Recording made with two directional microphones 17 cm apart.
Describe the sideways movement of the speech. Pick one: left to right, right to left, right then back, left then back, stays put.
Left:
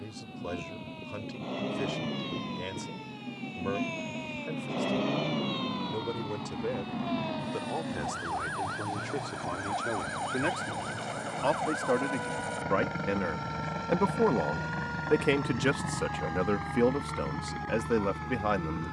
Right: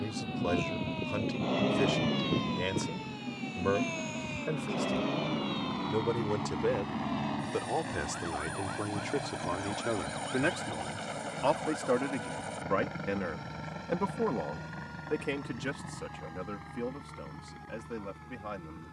right to left.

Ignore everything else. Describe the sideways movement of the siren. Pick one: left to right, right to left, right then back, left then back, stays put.
right to left.